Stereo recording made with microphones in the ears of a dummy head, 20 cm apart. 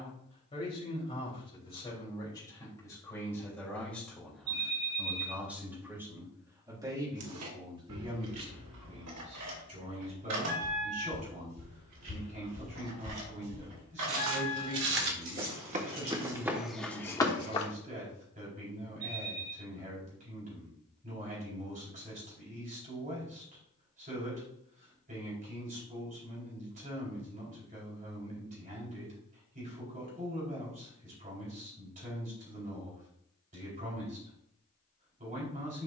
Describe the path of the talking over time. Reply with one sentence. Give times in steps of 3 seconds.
You can hear the talking on the left from 0 s, in the centre from 3 s and on the right from 6 s.